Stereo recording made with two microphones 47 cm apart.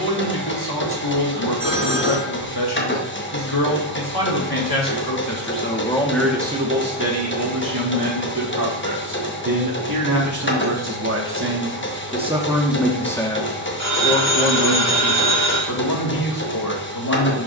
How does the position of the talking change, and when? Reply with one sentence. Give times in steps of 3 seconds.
You can hear the talking on the left from 0 s, on the right from 6 s, in the centre from 12 s and on the left from 15 s.